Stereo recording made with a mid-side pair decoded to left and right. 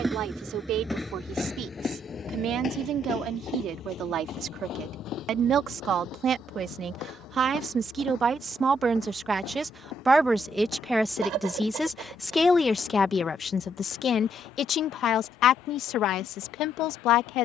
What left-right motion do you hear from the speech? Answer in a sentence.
You can hear the speech move from right to left.